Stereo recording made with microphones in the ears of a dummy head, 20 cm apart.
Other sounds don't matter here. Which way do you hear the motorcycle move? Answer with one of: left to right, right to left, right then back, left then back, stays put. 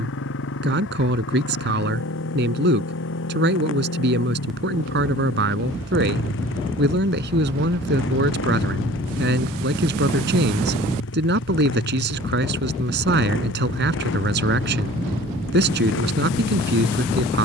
stays put.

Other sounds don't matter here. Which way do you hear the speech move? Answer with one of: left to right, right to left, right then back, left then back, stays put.
stays put.